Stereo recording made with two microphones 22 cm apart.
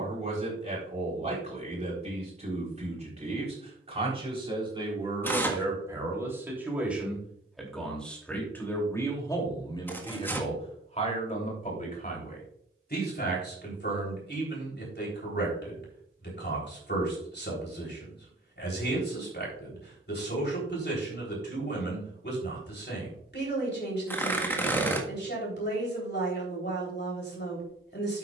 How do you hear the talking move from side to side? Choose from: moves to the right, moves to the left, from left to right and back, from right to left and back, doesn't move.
moves to the left.